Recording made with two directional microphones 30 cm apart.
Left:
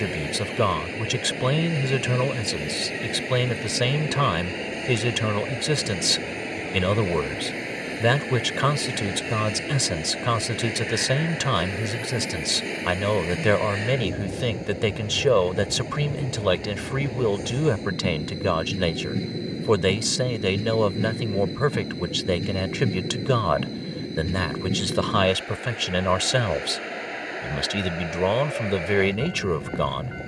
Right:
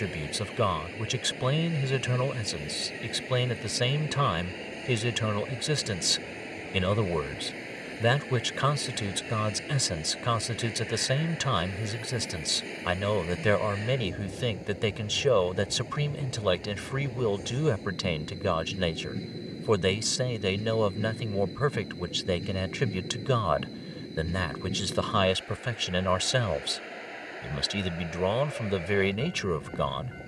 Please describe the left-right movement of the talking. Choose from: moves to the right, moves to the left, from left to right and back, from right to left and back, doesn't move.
doesn't move.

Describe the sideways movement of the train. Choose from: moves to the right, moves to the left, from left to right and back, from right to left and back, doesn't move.
doesn't move.